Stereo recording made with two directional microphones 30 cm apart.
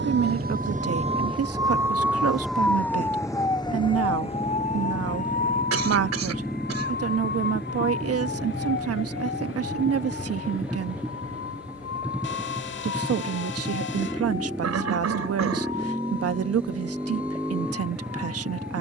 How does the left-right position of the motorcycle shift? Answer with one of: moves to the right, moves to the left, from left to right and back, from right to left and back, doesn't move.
doesn't move.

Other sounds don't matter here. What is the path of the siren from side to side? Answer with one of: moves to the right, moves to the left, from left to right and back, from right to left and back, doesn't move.
moves to the left.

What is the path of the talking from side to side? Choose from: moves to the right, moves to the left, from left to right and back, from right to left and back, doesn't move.
doesn't move.